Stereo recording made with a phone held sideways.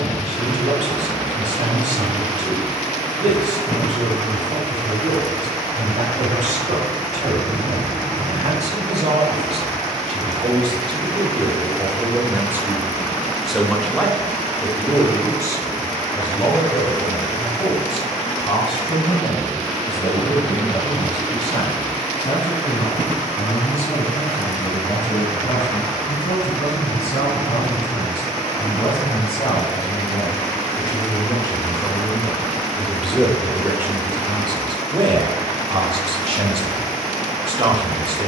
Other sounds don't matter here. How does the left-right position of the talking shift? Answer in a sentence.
In this clip you hear the talking go left and come back.